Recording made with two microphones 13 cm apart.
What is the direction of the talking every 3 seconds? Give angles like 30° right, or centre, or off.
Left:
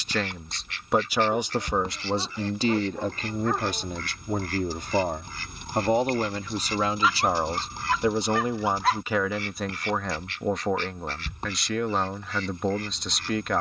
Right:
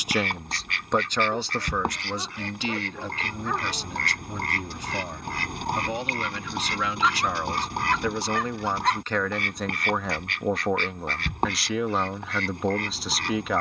20° left, 50° left, 30° left, centre, centre.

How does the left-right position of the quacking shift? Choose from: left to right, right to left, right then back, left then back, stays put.
stays put.